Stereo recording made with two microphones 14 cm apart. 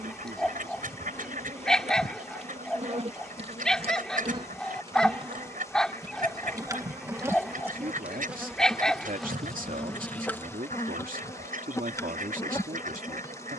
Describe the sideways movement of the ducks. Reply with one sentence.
You can hear the ducks stay put.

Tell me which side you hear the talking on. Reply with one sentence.
In this clip you hear the talking on the right.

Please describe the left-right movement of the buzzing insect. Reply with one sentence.
You can hear the buzzing insect go from the right side to the left.